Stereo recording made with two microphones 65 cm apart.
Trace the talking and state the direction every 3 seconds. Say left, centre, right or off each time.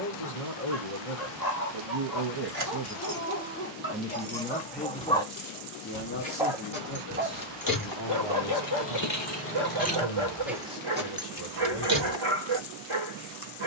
right, centre, left, left, off.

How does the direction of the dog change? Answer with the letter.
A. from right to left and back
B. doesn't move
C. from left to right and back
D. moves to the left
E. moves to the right
E.